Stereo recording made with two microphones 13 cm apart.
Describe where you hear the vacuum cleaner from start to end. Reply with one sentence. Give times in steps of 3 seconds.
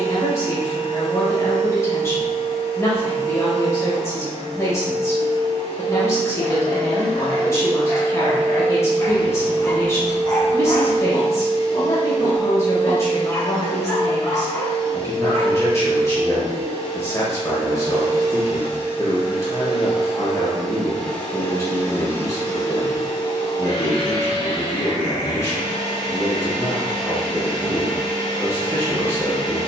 In this clip you hear the vacuum cleaner on the right from 0 s, in the centre from 18 s and on the left from 21 s.